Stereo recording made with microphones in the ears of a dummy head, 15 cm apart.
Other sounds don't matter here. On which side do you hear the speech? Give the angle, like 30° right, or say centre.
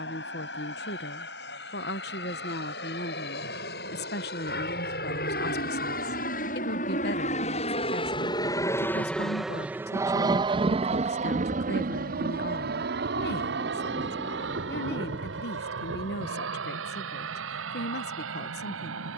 60° left.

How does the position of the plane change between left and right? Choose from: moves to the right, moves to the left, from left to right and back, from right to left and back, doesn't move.
moves to the right.